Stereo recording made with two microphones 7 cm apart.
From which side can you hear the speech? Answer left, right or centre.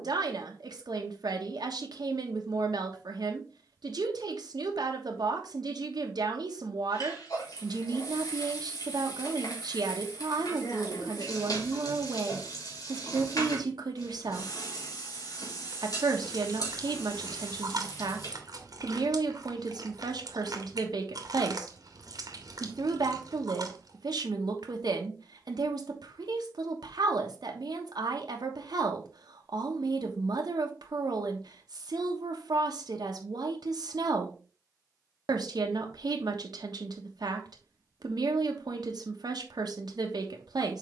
right.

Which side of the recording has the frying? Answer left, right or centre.
left.